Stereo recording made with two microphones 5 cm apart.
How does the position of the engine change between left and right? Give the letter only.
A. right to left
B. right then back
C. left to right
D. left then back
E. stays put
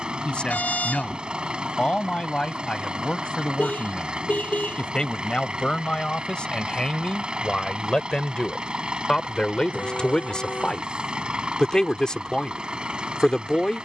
E.